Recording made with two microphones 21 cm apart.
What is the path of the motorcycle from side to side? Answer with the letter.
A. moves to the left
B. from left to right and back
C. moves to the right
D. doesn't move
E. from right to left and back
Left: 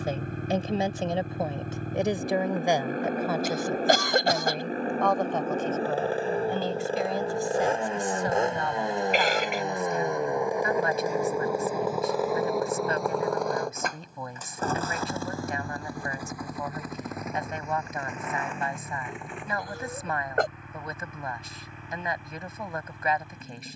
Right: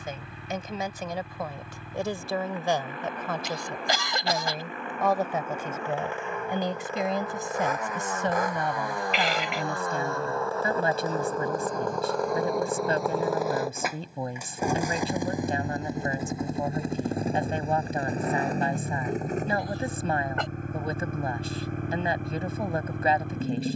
C.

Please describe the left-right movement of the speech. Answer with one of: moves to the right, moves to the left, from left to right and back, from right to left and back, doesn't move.
moves to the right.